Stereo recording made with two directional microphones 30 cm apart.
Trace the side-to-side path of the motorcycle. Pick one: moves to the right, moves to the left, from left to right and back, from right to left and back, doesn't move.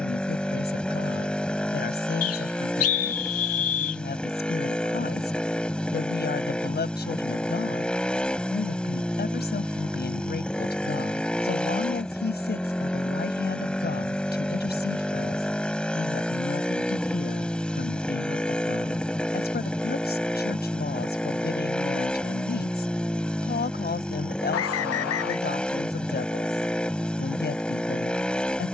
doesn't move.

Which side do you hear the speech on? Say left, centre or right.
left.